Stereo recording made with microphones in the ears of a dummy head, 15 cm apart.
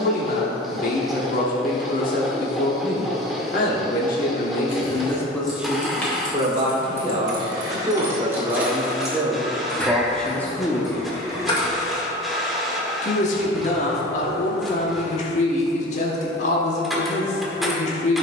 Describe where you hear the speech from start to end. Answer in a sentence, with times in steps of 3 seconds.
You can hear the speech on the left from 0 s, on the right from 6 s, in the centre from 9 s and on the left from 12 s.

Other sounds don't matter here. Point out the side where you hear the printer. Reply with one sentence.
In this clip you hear the printer in the centre.